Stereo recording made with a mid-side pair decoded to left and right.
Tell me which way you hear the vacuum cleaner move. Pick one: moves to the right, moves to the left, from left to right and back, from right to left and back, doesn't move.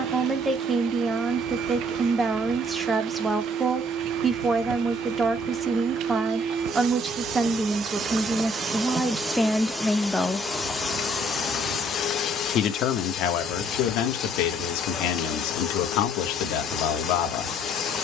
moves to the left.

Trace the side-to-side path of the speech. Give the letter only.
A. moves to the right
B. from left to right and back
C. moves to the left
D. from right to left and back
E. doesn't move
C.